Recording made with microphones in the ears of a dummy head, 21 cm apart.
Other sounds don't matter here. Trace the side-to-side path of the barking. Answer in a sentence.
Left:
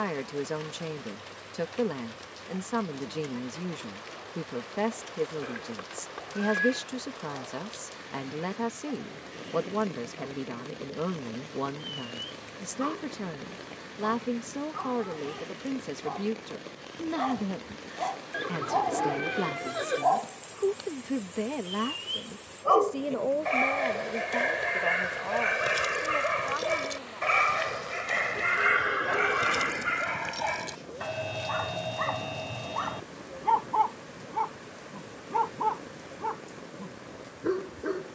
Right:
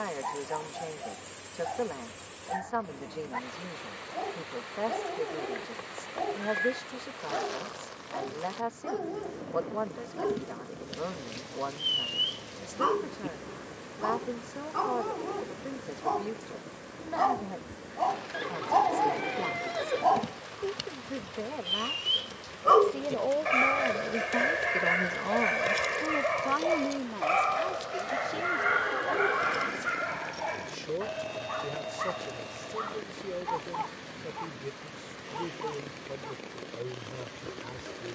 You can hear the barking go from the right side to the left.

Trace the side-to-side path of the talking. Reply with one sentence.
In this clip you hear the talking move from left to right.